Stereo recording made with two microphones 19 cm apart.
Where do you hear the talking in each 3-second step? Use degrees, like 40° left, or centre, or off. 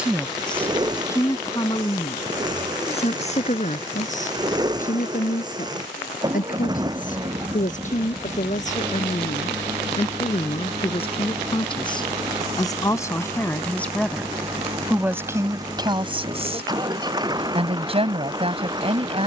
20° left, 40° left, 40° left, 30° left, 10° left, 20° right, 30° right.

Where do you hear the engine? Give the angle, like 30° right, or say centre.
20° right.